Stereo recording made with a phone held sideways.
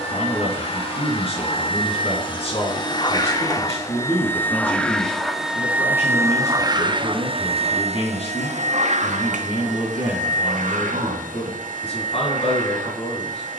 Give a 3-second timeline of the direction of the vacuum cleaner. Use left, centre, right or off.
left, centre, right, right, right.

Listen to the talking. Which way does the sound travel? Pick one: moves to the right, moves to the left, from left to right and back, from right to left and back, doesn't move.
doesn't move.